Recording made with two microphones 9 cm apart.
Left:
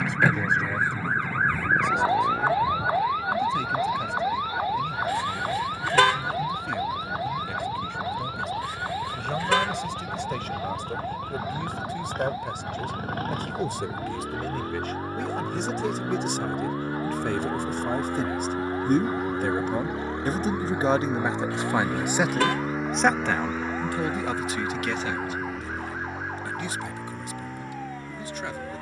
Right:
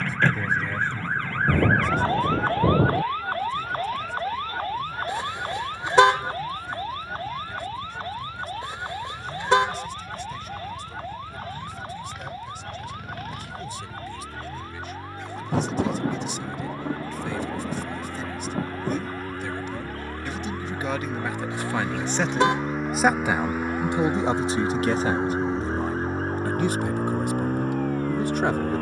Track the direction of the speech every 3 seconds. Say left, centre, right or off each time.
left, left, left, left, left, left, left, centre, right, right.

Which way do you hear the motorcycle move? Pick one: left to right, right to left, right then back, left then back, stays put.
left to right.